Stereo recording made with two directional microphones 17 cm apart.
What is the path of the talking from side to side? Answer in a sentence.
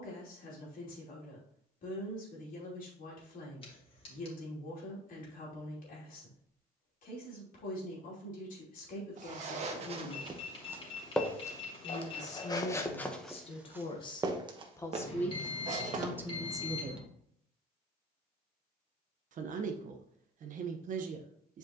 You can hear the talking move from left to right.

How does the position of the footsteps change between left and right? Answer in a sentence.
You can hear the footsteps move from right to left and back again.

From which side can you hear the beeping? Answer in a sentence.
In this clip you hear the beeping on the left.